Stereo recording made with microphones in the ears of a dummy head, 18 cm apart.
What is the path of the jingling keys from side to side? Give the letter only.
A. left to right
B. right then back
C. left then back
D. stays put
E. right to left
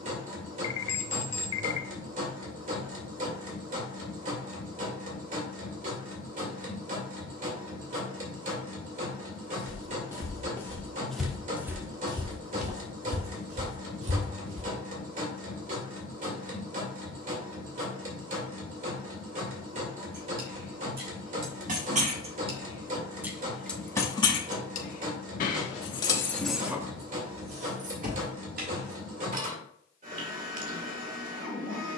C.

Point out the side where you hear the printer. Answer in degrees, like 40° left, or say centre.
40° right.